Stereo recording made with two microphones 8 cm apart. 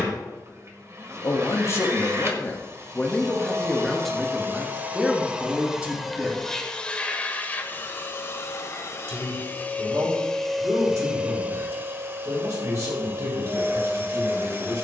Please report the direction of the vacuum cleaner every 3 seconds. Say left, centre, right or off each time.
right, right, left, centre, right.